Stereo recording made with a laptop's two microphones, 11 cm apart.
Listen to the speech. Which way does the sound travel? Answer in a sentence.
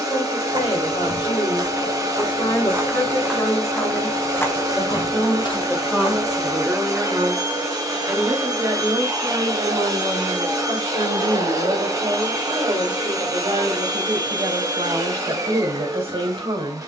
You can hear the speech go from the left side to the right.